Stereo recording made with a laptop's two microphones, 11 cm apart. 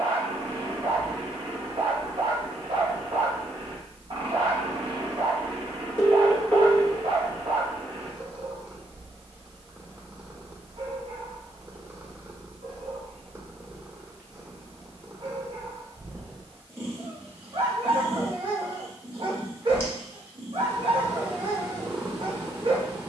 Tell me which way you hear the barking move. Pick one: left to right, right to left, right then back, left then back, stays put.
stays put.